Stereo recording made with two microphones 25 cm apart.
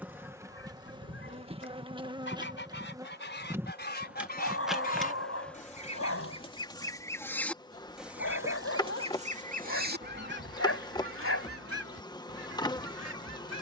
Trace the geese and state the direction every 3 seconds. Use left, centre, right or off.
left, left, centre, right, right.